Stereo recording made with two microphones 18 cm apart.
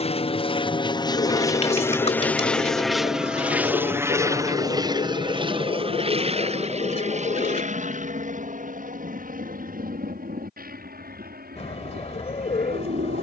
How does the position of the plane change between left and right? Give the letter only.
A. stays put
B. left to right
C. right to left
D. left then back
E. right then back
B.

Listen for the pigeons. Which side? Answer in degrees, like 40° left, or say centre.
40° left.